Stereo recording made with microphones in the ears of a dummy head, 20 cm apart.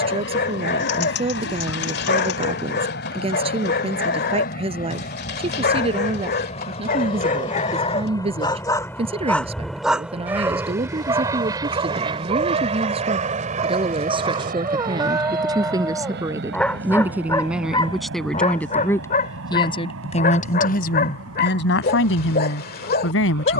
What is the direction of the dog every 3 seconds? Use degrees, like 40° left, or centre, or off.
50° left, 50° left, 30° left, 20° right, 30° right, centre, 40° left, 40° left.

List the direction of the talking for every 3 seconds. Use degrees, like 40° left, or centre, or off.
30° right, 30° right, 30° right, 30° right, 20° right, 10° right, 20° left, 60° left.